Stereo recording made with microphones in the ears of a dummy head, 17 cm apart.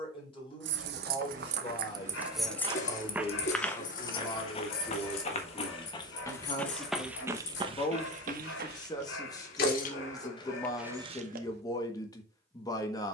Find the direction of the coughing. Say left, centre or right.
left.